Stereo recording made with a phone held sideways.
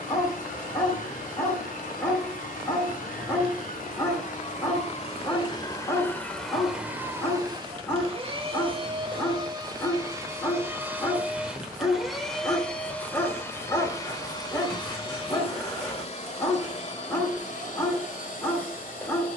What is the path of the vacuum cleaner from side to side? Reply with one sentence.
You can hear the vacuum cleaner move from left to right and back again.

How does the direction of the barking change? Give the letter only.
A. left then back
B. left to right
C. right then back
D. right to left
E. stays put
E.